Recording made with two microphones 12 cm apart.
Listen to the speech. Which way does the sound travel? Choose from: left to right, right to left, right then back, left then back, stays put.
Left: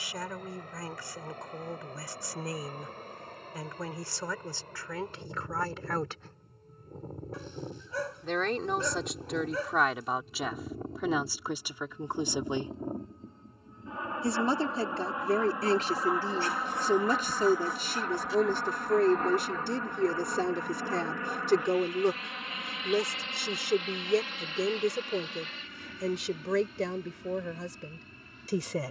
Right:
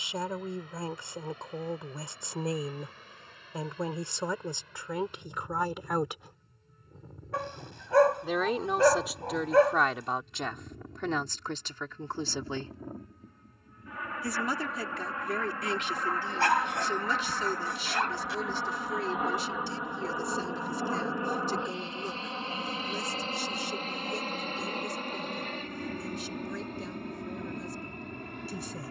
right to left.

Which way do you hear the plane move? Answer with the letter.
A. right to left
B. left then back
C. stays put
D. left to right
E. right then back
D.